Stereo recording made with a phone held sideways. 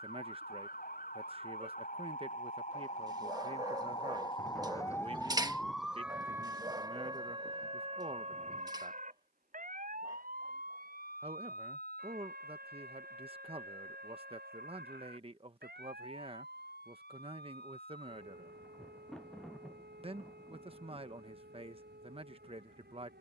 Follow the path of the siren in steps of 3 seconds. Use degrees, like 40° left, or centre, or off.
60° left, 20° left, 30° right, 60° right, 70° right, 70° right, 70° right, 80° right.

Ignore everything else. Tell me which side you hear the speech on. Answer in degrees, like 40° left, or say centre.
40° right.